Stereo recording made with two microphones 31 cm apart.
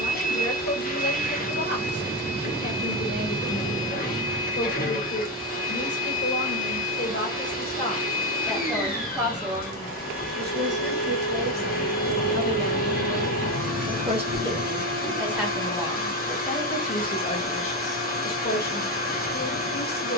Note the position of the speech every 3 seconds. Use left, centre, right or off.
left, left, left, right, right, centre, left.